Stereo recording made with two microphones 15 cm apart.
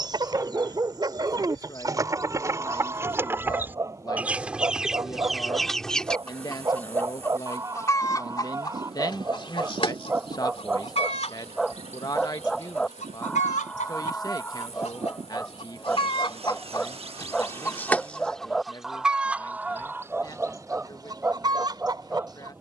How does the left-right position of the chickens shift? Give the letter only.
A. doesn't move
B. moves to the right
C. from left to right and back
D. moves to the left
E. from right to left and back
E.